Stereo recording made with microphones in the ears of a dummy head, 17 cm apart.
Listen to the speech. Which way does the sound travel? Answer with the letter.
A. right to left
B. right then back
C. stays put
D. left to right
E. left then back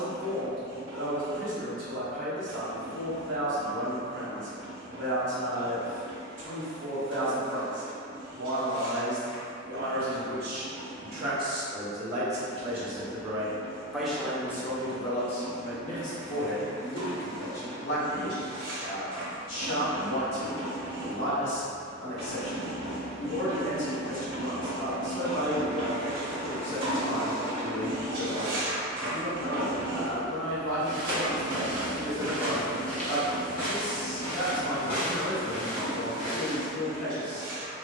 A.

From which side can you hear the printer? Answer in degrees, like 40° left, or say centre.
60° right.